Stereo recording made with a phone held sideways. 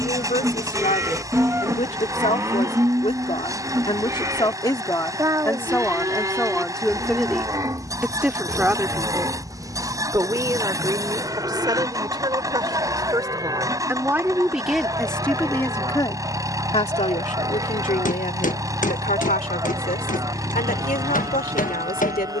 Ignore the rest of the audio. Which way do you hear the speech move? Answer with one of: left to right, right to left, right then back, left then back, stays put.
right then back.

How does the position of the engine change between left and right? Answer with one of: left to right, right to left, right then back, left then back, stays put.
stays put.